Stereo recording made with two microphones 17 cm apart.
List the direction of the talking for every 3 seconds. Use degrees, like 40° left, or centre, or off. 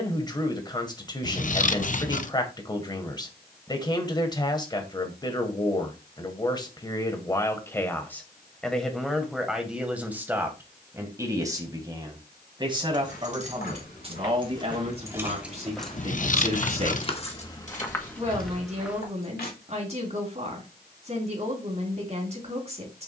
30° left, 30° left, 20° left, 10° right, 30° right, 40° right, 40° right, 40° right.